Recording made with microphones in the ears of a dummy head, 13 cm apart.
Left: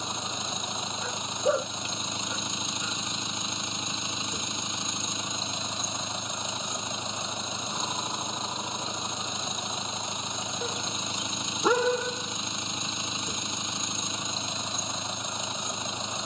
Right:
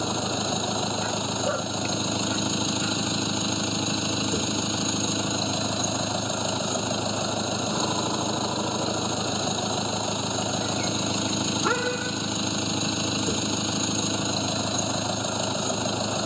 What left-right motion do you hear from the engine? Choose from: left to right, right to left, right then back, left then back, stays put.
stays put.